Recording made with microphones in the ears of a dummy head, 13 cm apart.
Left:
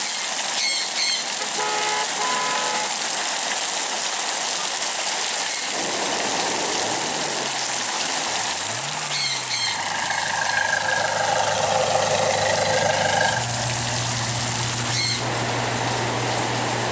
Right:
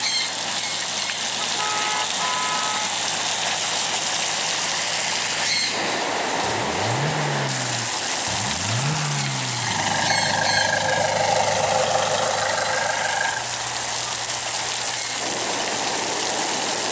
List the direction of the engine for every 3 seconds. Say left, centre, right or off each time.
right, right, right, right, left, left.